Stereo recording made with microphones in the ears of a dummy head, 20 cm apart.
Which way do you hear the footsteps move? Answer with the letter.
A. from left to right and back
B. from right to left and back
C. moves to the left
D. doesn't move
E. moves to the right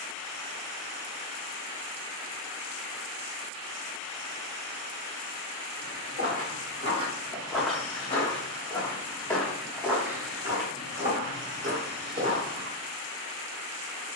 B.